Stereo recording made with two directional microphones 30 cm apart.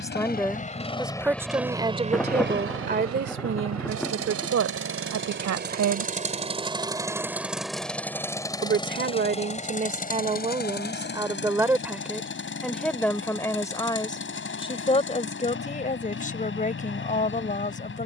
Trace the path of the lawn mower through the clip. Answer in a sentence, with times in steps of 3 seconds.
You can hear the lawn mower in the centre from 0 s, on the right from 3 s, in the centre from 6 s and on the left from 9 s.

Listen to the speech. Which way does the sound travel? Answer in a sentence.
You can hear the speech go right and come back.